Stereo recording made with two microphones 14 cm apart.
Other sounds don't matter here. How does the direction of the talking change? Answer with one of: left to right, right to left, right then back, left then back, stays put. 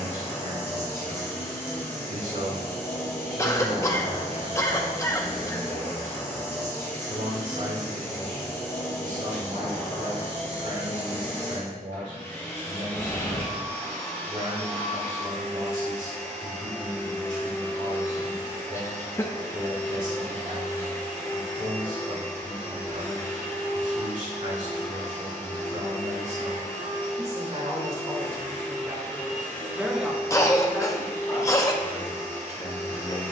right to left.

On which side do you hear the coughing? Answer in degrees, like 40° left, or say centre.
20° left.